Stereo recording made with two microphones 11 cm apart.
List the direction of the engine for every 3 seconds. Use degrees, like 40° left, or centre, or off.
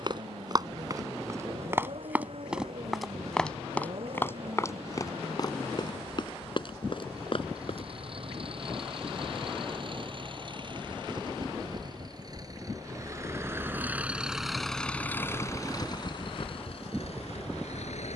60° right, 60° right, 50° right, 50° right, 20° right, 50° left.